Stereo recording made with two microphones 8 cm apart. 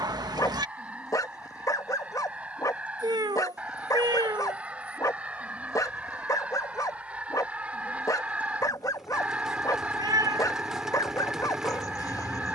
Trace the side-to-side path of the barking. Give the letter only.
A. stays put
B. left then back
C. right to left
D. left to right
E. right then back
A.